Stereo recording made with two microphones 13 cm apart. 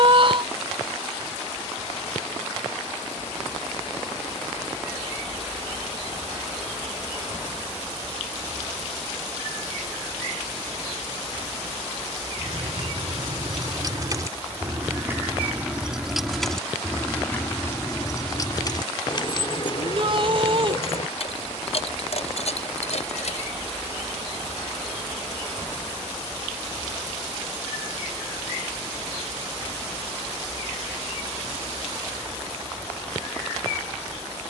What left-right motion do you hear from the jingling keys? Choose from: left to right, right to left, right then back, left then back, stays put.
right to left.